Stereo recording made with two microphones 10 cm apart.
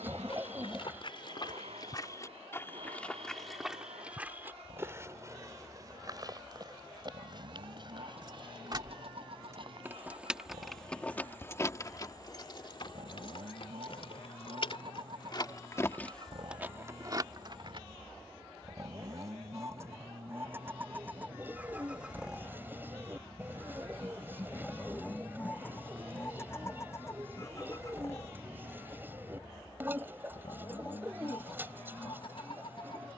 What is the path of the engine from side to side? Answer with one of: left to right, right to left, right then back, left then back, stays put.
right to left.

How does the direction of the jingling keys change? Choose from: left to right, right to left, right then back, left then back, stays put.
left then back.